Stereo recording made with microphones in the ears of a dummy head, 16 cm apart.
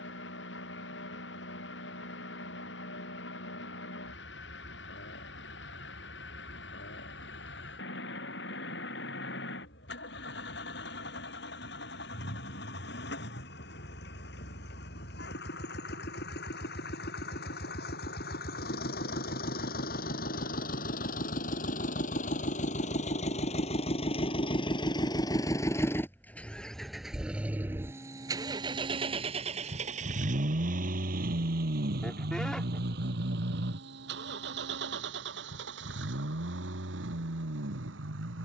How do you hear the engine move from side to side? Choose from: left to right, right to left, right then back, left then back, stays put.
left to right.